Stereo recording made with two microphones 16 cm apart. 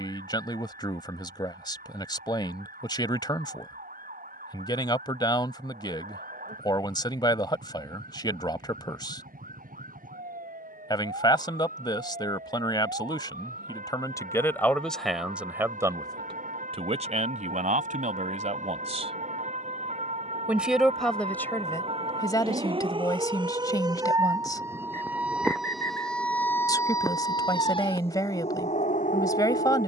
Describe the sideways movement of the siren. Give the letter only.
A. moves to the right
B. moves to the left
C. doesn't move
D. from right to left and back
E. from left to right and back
B.